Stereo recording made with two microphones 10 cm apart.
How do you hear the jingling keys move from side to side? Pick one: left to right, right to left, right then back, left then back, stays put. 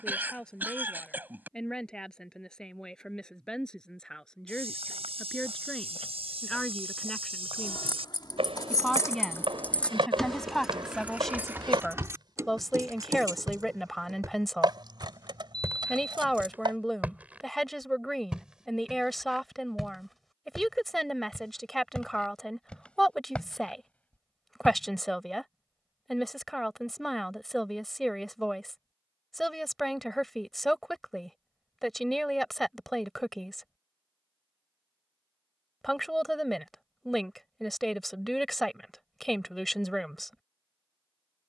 left to right.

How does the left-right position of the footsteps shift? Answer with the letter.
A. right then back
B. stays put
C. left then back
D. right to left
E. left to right
D.